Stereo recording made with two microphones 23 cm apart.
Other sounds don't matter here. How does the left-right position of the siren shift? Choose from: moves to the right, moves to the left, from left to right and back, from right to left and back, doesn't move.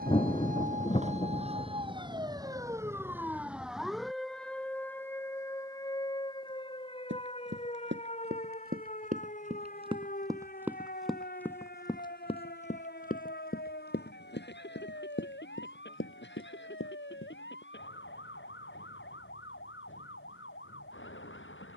moves to the left.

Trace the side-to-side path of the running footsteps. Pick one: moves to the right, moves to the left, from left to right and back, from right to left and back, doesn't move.
moves to the left.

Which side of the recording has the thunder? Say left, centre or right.
left.